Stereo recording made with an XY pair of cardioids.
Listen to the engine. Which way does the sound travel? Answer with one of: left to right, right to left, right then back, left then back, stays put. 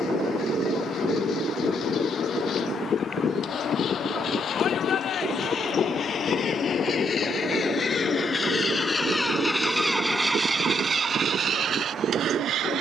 left to right.